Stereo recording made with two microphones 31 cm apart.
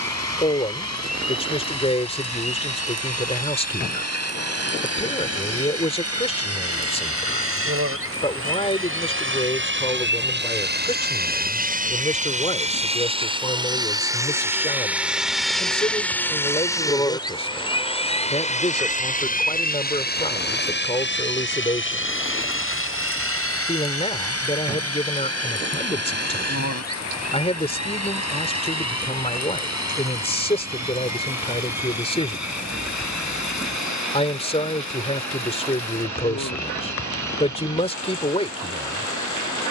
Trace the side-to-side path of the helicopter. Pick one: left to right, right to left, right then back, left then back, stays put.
right to left.